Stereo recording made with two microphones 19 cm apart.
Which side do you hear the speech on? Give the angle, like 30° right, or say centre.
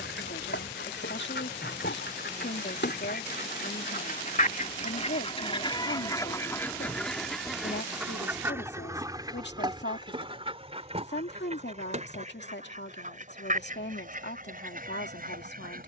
70° left.